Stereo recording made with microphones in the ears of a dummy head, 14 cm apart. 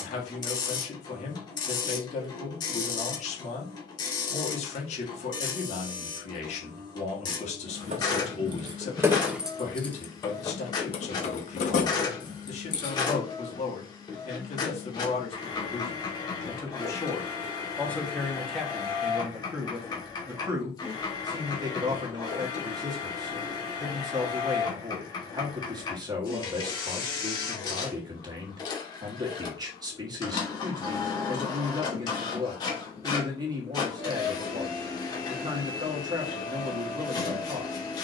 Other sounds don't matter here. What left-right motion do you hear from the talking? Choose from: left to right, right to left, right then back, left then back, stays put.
left to right.